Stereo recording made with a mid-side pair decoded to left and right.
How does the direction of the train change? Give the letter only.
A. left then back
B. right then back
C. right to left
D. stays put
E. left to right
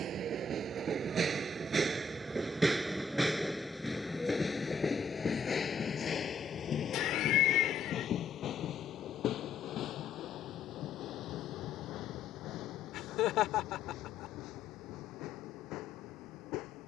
C.